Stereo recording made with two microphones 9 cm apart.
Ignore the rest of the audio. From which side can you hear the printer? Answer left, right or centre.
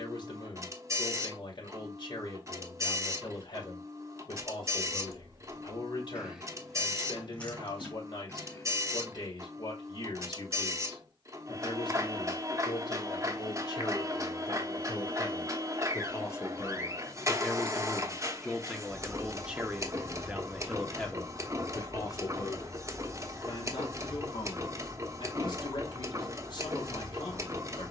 right.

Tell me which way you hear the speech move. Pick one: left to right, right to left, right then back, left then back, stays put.
right then back.